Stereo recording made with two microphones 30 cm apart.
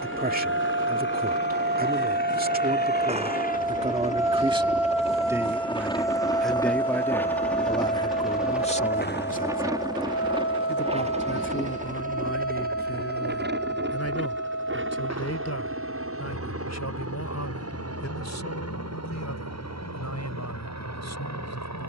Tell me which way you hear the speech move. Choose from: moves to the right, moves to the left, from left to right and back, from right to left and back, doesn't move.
moves to the left.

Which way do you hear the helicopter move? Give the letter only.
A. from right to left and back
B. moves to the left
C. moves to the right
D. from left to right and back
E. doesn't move
C.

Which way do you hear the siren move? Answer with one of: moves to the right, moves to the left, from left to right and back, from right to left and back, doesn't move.
moves to the left.